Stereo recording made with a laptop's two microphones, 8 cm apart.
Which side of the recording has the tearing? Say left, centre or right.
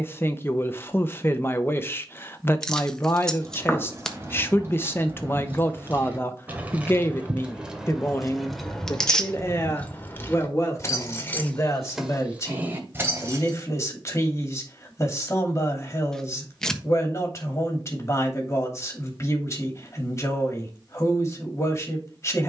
centre.